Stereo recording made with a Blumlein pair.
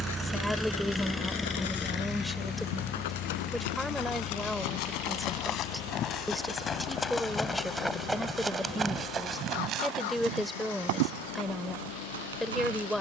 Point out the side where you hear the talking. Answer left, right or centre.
centre.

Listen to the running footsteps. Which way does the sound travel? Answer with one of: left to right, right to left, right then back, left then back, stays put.
left to right.